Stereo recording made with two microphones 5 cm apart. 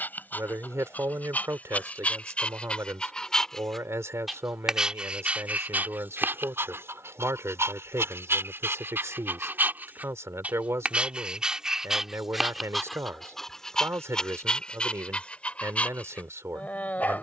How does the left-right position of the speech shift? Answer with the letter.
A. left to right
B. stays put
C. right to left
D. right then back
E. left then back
B.